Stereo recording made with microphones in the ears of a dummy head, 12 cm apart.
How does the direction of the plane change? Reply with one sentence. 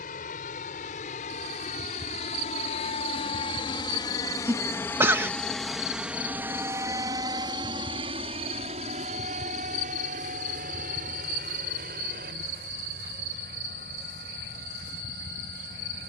In this clip you hear the plane move from left to right.